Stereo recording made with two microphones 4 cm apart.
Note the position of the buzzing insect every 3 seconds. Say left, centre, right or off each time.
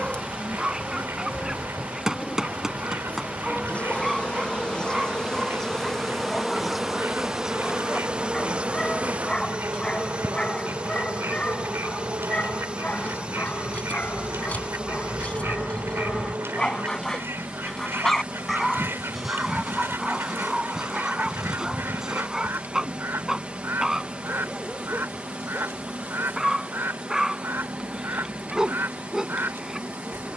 left, left, centre, right, right, right, right, right, right, right.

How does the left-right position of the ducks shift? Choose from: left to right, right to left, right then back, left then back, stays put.
stays put.